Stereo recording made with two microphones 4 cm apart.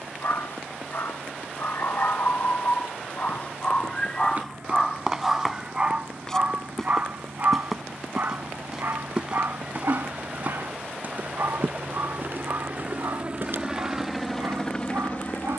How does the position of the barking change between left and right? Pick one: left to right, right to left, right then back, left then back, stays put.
left to right.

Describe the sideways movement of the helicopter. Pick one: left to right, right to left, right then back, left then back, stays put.
right to left.